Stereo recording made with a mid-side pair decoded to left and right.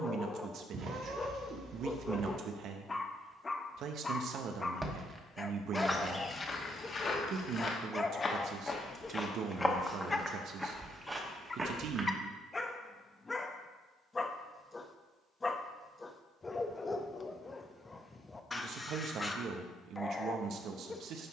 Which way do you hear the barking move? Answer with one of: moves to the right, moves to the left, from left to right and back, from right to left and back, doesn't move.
doesn't move.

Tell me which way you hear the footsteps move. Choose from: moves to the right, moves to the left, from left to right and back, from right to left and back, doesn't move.
from right to left and back.